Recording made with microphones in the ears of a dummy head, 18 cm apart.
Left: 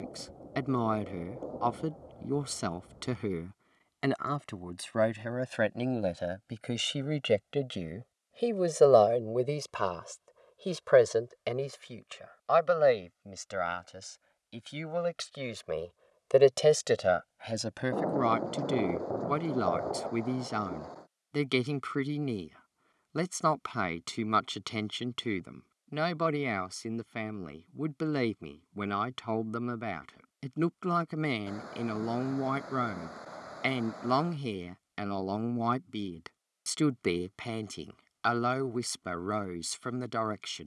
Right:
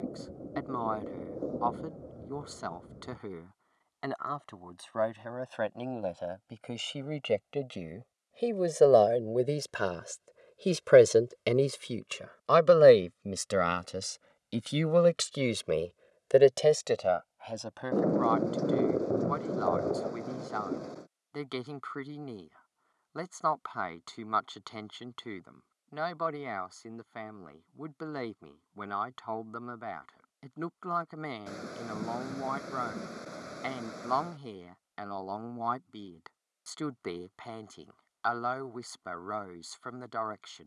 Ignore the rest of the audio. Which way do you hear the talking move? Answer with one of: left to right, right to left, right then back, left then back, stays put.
right then back.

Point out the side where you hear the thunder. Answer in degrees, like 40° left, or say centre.
30° right.